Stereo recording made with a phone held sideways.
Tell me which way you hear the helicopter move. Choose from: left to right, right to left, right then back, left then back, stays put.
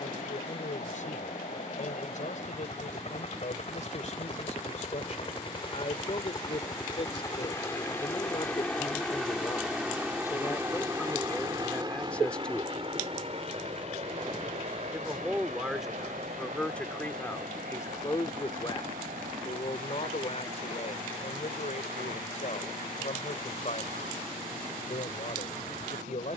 left to right.